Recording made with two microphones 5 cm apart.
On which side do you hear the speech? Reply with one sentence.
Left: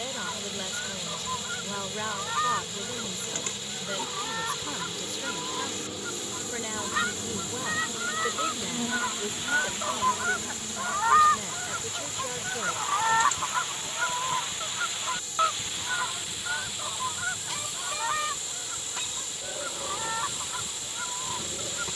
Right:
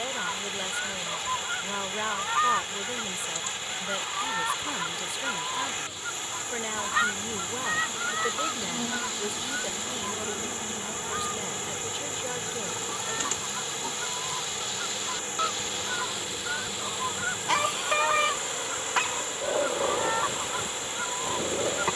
You can hear the speech in the centre.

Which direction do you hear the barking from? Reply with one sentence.
You can hear the barking on the right.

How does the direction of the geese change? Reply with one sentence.
You can hear the geese move from right to left and back again.